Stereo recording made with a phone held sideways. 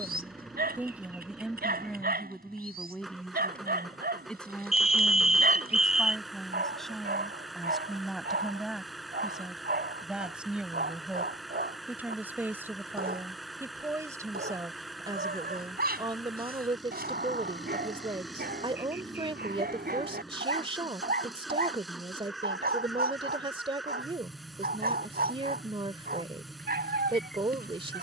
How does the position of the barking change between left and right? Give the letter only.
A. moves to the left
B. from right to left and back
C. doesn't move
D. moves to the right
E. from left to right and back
C.